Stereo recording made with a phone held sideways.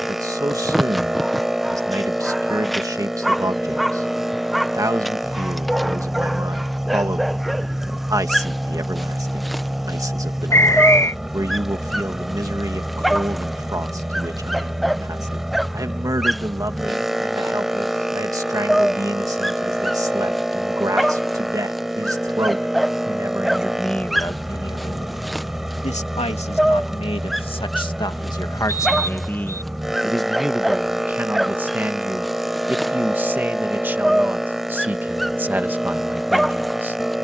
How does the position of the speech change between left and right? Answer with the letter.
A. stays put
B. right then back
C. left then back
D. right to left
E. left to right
C.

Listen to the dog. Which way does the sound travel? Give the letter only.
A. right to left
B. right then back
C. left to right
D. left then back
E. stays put
E.